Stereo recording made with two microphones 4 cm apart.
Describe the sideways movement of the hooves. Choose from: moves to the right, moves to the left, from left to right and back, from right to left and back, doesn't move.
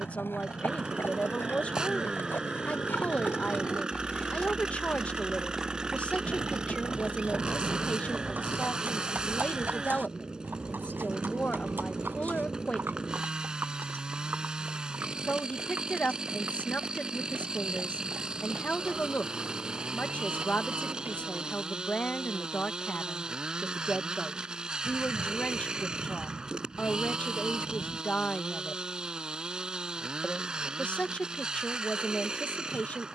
moves to the right.